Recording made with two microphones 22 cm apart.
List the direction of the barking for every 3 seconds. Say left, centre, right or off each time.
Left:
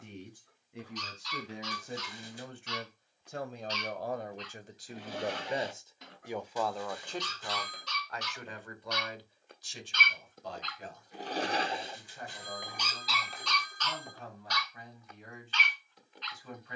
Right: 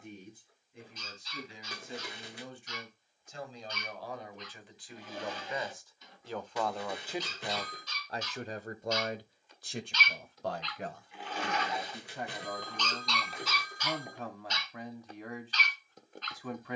left, left, left, left, centre, right.